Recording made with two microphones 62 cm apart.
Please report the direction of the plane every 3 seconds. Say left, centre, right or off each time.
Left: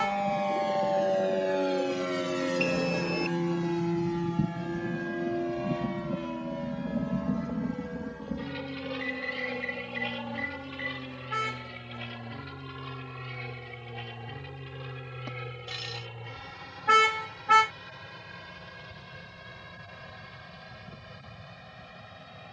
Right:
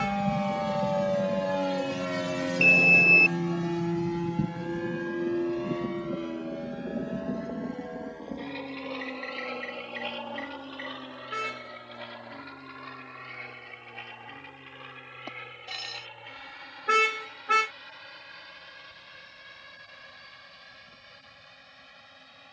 right, centre, left, left, left, left, left, left.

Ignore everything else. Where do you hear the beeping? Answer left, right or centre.
left.